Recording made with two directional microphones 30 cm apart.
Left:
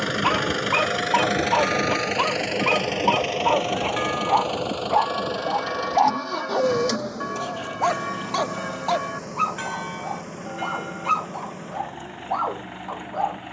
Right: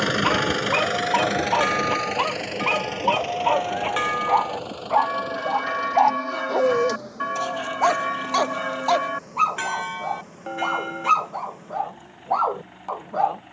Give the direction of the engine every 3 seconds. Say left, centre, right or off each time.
centre, left, left, left, left.